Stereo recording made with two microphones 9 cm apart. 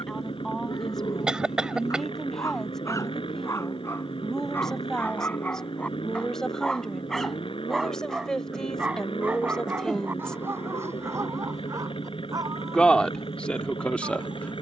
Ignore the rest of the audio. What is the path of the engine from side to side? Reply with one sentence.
In this clip you hear the engine stay in one place.